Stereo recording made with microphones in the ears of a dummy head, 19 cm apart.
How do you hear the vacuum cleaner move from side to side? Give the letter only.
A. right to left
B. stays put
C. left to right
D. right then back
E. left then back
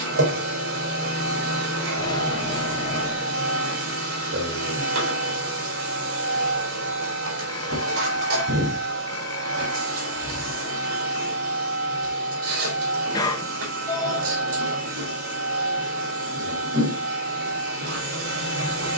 B.